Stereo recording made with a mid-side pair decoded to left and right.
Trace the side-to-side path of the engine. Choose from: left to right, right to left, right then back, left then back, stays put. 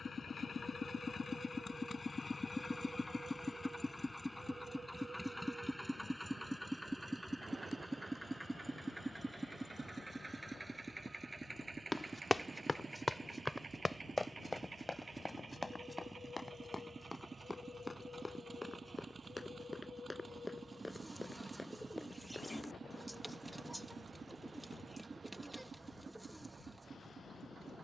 left to right.